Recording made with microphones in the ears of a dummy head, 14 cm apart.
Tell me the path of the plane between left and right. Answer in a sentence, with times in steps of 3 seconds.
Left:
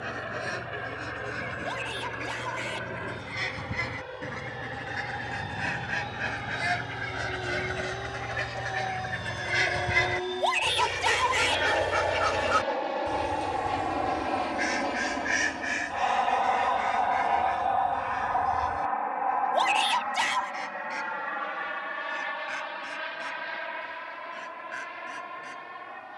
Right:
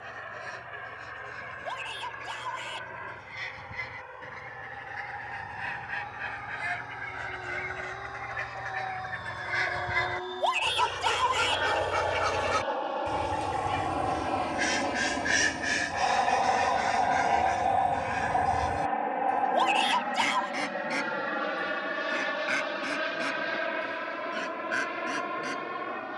In this clip you hear the plane on the left from 0 s, in the centre from 12 s and on the right from 18 s.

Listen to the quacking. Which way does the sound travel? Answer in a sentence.
You can hear the quacking move from left to right.